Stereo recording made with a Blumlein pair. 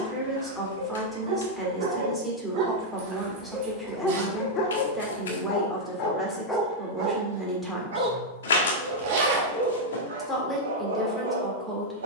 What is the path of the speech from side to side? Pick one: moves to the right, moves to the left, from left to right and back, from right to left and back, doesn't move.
doesn't move.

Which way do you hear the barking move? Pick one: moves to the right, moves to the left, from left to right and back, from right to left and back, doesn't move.
from right to left and back.